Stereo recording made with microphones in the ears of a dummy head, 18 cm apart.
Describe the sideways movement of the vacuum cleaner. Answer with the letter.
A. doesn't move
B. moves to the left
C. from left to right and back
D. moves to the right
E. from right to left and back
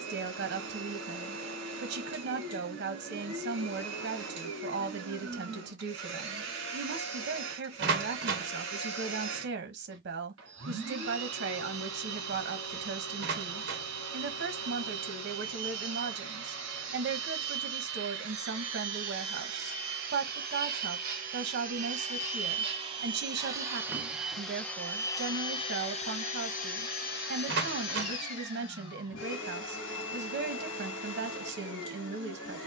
B.